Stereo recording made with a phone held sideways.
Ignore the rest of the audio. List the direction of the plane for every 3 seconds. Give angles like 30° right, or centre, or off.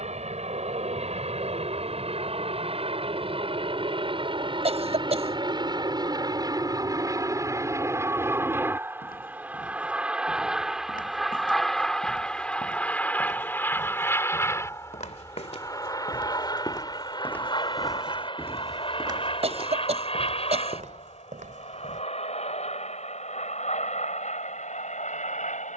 50° right, 40° right, 20° right, centre, 10° left, 30° left, 40° left, 40° left, 50° left.